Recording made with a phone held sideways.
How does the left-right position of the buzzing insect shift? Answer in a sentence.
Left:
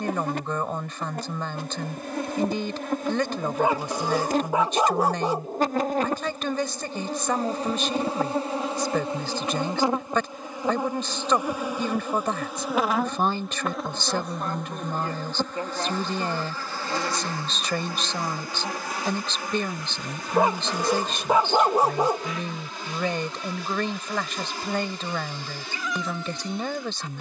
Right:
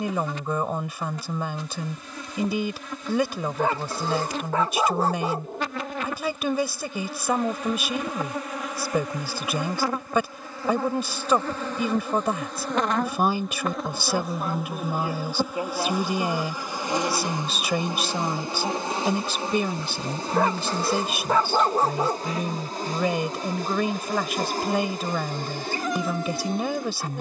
In this clip you hear the buzzing insect travel towards the right.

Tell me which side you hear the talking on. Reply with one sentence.
You can hear the talking in the centre.